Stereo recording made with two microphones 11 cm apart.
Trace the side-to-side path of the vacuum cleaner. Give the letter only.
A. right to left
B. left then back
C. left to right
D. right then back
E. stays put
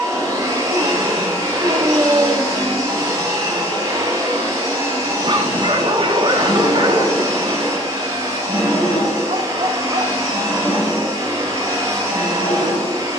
E.